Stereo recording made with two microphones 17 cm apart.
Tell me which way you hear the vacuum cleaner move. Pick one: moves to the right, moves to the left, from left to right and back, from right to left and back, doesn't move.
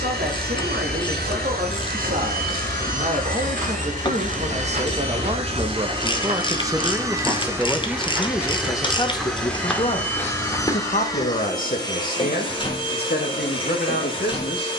moves to the left.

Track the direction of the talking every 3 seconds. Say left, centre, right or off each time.
right, right, centre, left, left.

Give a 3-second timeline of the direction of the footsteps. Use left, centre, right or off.
off, right, right, centre, off.